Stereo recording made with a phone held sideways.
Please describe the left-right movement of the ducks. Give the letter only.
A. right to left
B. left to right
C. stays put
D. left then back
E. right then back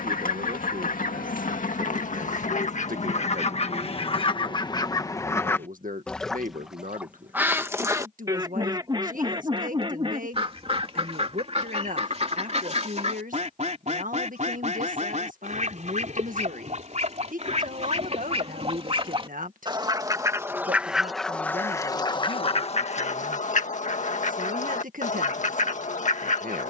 E.